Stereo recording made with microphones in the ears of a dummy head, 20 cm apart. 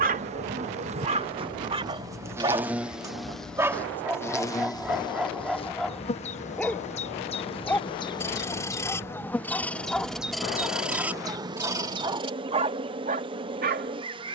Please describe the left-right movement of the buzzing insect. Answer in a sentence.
In this clip you hear the buzzing insect go left and come back.